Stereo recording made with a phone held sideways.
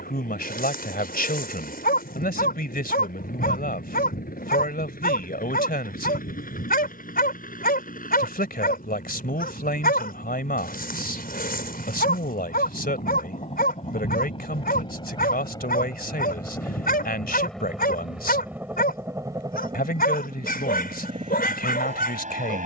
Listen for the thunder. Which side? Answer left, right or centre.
left.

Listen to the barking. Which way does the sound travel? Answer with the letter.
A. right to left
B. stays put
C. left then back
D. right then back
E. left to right
B.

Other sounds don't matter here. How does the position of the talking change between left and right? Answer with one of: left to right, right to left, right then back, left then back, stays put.
stays put.